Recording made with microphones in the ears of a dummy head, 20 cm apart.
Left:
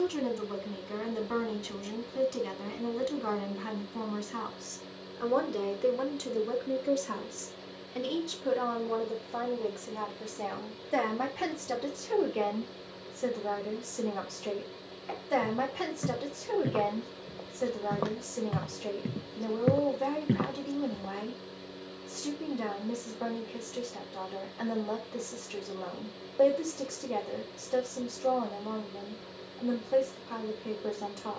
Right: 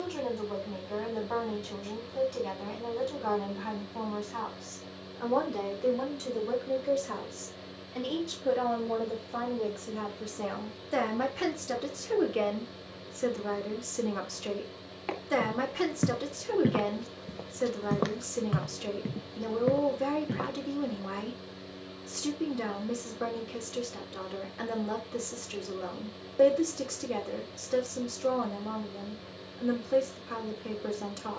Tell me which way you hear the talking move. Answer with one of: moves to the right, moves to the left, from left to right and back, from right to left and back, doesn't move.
moves to the right.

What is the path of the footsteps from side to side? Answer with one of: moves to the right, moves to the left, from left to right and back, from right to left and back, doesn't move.
moves to the left.